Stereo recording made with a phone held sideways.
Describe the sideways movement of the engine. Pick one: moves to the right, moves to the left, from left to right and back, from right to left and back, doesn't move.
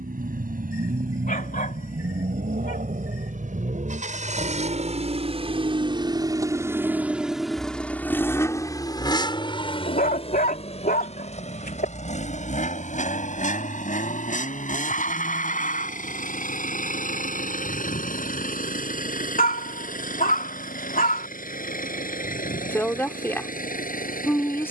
moves to the left.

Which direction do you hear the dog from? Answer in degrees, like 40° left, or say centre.
80° left.